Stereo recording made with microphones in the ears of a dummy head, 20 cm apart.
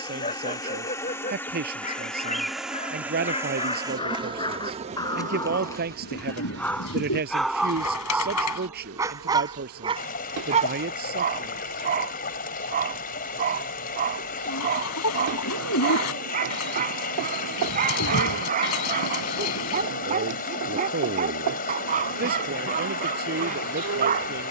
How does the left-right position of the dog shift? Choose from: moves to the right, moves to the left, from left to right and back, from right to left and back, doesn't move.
moves to the right.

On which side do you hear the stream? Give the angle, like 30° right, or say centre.
40° left.